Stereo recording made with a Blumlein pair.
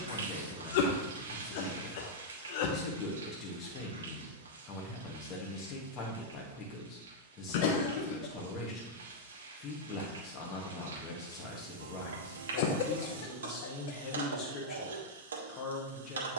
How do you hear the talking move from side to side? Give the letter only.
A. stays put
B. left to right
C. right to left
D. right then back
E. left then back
A.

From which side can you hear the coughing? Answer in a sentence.
In this clip you hear the coughing on the left.